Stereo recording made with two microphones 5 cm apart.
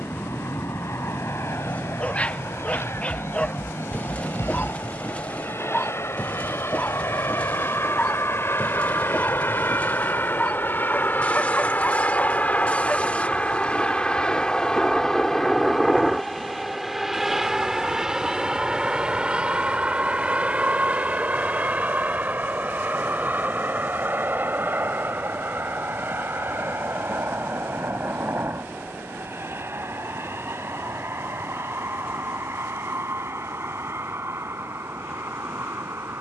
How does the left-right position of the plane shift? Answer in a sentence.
You can hear the plane move from left to right.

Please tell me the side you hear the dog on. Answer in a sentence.
You can hear the dog on the left.